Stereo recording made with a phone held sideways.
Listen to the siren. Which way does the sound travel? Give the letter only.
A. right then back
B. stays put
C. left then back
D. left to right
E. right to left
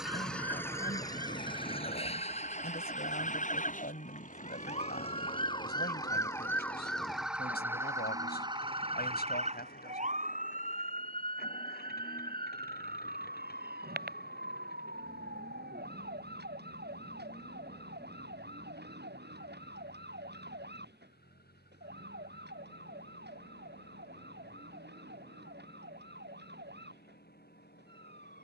D.